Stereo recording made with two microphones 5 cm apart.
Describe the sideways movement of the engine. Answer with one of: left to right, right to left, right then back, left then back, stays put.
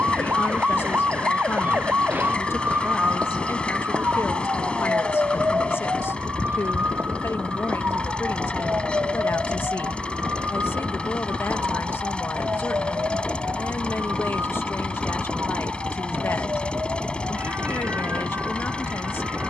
stays put.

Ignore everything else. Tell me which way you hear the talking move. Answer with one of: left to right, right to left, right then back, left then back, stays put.
stays put.